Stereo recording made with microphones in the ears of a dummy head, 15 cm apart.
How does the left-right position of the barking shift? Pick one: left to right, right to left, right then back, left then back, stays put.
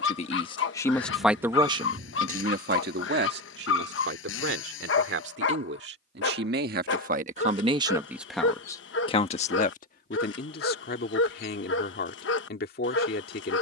stays put.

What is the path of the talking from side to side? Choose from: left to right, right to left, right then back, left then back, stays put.
right then back.